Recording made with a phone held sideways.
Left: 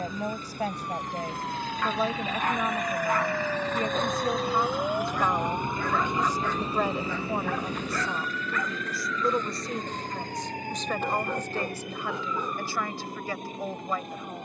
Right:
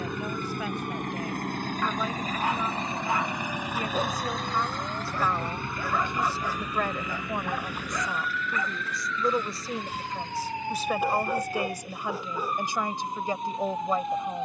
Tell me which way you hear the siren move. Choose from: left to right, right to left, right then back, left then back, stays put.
left to right.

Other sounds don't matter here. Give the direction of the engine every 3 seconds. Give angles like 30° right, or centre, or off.
50° right, centre, 30° left, 50° left, 50° left.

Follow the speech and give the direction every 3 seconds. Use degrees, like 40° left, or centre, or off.
40° left, 20° left, 10° left, 10° right, 20° right.